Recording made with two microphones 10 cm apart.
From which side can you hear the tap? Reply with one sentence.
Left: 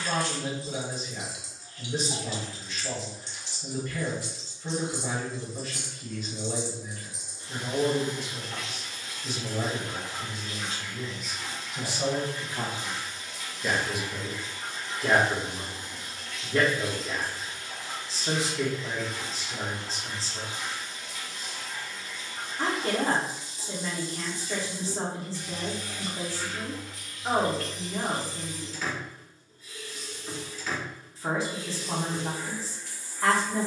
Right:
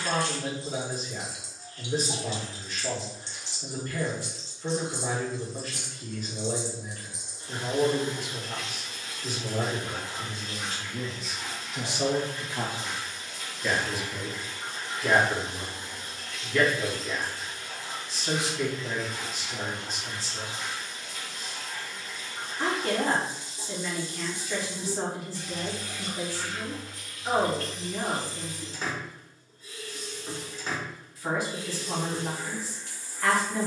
In this clip you hear the tap on the right.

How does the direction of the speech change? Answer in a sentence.
You can hear the speech move from right to left.